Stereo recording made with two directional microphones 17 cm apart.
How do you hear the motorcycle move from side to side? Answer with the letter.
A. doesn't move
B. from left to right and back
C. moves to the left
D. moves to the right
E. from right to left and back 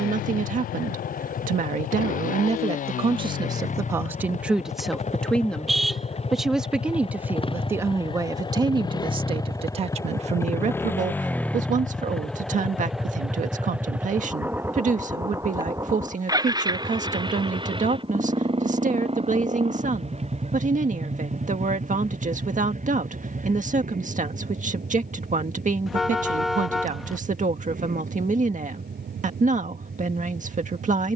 D.